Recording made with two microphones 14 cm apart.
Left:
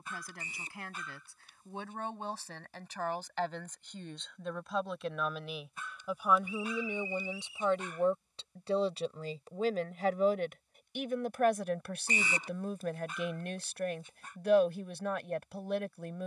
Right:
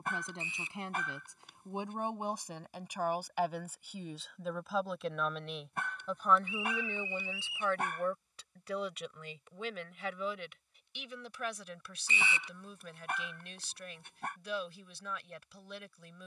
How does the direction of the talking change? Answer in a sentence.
You can hear the talking move to the left.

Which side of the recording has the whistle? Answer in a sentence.
You can hear the whistle on the left.